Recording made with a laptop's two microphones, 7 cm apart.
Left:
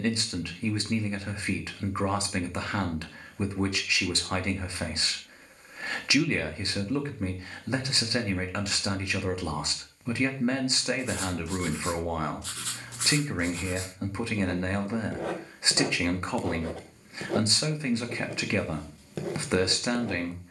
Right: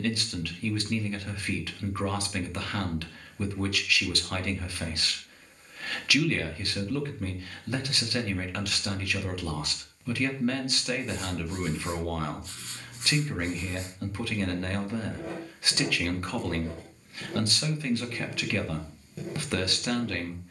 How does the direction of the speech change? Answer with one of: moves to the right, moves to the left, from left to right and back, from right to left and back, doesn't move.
doesn't move.